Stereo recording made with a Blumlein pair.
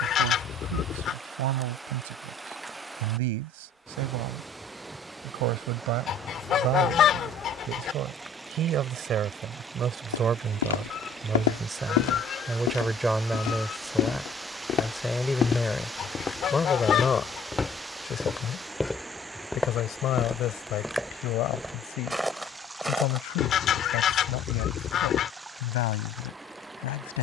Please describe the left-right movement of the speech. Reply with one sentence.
You can hear the speech move to the left.